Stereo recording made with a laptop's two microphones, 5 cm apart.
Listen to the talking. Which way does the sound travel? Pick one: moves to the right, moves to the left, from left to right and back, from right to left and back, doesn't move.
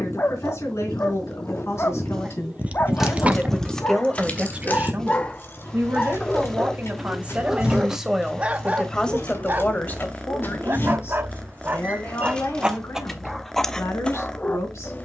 from left to right and back.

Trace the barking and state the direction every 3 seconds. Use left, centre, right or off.
left, left, centre, right, centre.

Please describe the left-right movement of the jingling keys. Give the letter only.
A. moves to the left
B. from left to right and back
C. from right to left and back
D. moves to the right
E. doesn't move
C.